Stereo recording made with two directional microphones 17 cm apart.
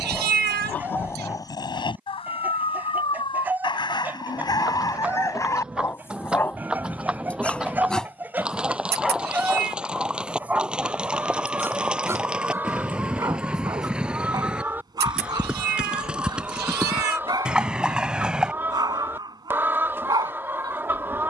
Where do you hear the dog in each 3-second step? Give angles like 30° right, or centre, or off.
20° left, 20° left, 10° left, 10° right, 20° right, 20° right, 20° right.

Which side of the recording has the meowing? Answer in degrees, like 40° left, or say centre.
70° right.